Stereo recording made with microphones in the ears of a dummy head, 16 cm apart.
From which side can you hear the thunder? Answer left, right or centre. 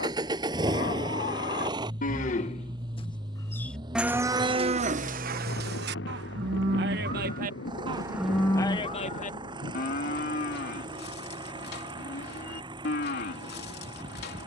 left.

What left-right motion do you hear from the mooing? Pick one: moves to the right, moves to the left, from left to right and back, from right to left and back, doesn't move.
from left to right and back.